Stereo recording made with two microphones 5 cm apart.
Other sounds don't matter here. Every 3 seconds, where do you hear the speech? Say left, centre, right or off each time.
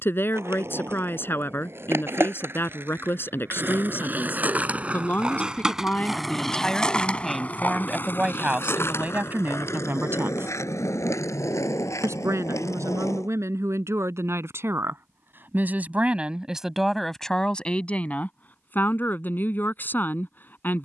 left, left, centre, right, right, centre, left.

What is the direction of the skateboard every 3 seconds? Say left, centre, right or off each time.
right, right, left, left, left, off, off.